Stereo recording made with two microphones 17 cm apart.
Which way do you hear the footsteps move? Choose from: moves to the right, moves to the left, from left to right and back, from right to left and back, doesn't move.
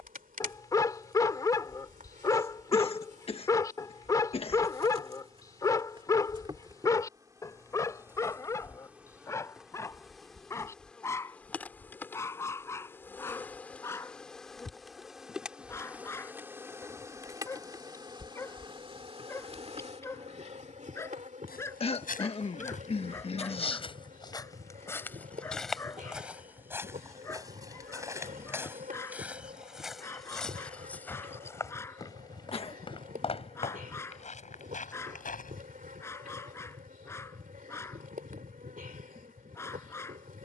from left to right and back.